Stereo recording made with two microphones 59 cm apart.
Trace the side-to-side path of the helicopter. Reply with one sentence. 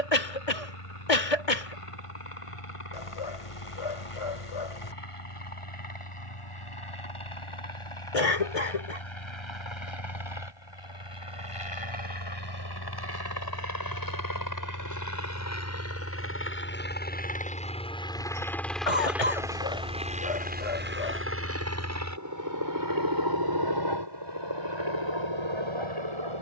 You can hear the helicopter move to the right.